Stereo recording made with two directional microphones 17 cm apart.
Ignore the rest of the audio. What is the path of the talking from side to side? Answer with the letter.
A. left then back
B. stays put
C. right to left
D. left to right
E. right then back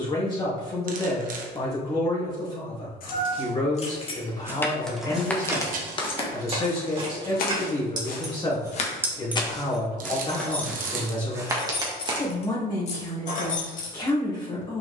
B.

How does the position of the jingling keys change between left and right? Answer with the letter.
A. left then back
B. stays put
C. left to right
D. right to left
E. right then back
E.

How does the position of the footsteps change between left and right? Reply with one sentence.
You can hear the footsteps go left and come back.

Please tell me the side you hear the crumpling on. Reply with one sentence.
You can hear the crumpling on the right.